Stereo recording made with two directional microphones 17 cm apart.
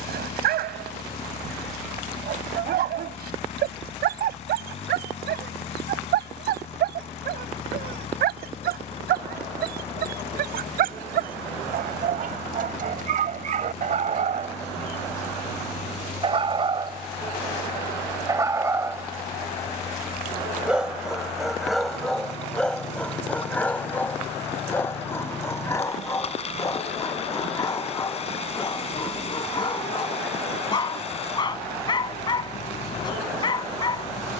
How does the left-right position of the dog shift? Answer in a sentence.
You can hear the dog go from the right side to the left.